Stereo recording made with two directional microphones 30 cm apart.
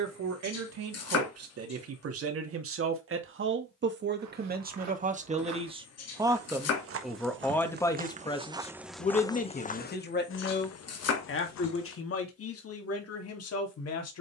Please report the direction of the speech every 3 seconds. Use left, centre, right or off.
right, right, centre, left, left.